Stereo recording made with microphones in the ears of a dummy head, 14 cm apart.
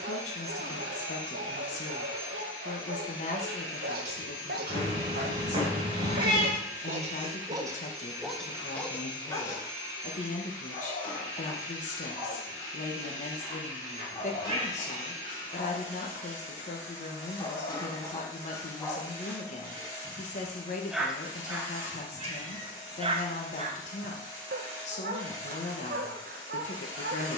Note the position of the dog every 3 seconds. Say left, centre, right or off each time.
right, right, right, left, left, left, centre, right, right.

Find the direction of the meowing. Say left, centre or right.
right.